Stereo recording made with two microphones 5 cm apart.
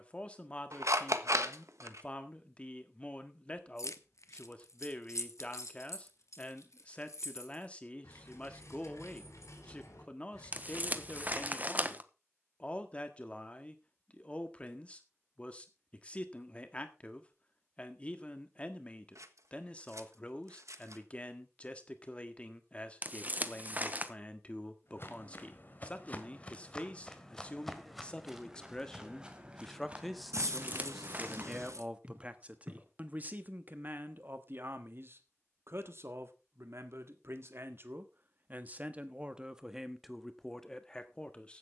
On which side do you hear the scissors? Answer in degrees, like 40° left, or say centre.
80° right.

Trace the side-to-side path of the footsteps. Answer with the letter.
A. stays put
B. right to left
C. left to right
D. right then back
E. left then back
C.